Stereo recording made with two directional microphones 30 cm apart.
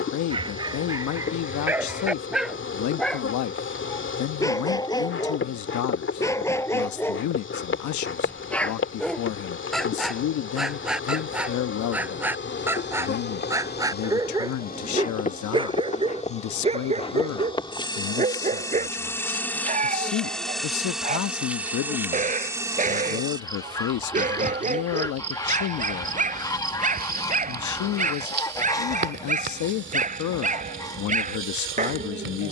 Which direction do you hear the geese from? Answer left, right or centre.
centre.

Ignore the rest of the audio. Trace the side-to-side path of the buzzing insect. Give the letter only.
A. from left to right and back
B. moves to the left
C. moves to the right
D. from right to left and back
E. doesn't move
C.